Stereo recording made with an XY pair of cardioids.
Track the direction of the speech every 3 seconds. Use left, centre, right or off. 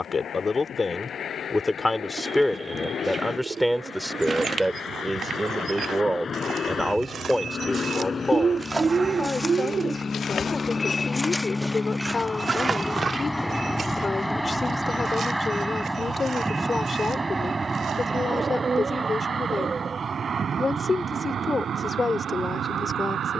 left, centre, centre, left, left, left, left, left.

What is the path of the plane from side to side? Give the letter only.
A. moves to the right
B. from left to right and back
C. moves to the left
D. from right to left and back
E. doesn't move
A.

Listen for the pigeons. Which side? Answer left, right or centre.
right.